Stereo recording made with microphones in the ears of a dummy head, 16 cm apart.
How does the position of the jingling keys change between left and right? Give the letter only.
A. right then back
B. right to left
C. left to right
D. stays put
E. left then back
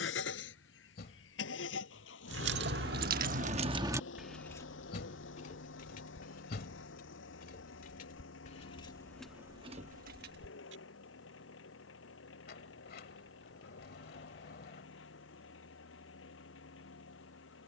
E.